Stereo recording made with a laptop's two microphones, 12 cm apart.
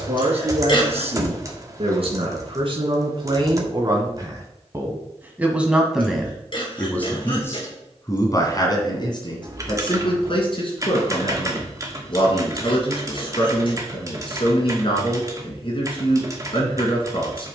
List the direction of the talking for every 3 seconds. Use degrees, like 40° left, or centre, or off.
50° right, 30° right, 20° left, 50° left, 50° left, 50° left.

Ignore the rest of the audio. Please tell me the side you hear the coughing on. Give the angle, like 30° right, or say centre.
50° left.